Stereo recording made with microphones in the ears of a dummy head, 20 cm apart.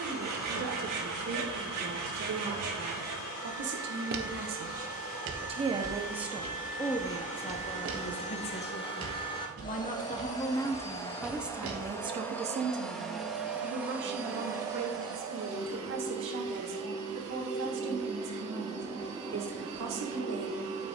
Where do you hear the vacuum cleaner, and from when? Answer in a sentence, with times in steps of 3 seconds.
You can hear the vacuum cleaner on the left from 0 s, in the centre from 12 s and on the right from 15 s.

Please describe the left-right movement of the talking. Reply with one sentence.
In this clip you hear the talking go left and come back.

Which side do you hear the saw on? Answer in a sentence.
You can hear the saw on the right.